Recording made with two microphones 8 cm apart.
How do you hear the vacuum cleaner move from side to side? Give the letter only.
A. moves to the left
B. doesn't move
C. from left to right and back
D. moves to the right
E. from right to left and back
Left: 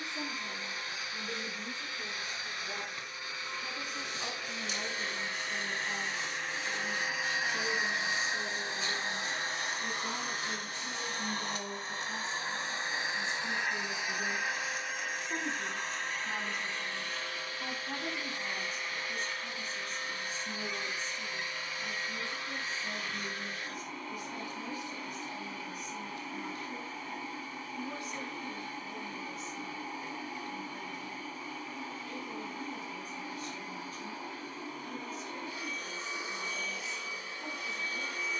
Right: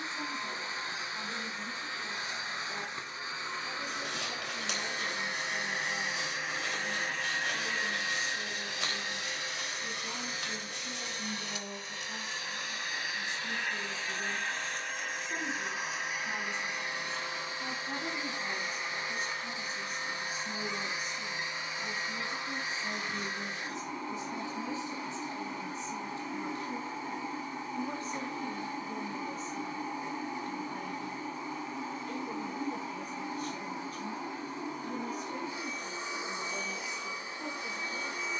E.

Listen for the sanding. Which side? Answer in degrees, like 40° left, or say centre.
70° right.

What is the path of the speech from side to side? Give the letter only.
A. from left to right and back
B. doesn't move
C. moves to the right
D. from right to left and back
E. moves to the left
C.